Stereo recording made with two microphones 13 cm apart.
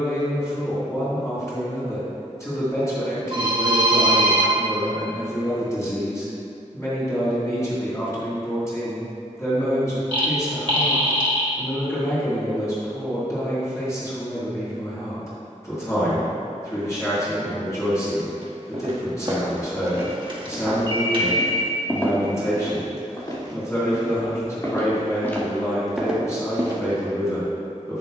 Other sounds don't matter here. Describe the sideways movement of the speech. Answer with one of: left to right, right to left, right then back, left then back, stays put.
stays put.